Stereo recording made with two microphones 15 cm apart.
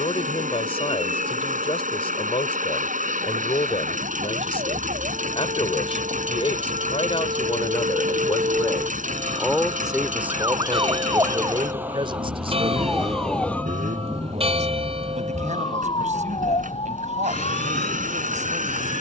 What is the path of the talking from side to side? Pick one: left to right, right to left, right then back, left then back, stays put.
left to right.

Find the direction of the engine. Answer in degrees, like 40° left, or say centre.
60° right.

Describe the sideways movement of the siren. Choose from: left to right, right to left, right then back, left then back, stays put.
right to left.